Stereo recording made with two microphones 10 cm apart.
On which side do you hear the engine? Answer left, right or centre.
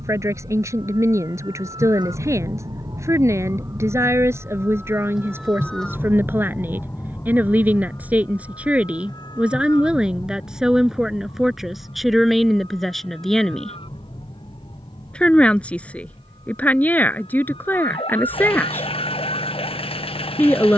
left.